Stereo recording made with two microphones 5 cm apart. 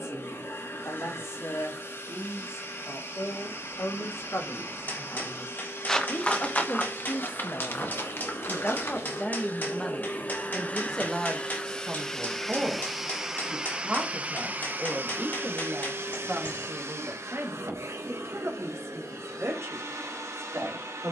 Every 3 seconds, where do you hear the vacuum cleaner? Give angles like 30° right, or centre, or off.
60° left, 60° left, 50° left, 30° left, 10° right, 50° right, 70° right.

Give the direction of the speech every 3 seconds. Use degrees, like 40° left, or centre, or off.
70° left, 60° left, 40° left, 10° left, 20° right, 40° right, 50° right.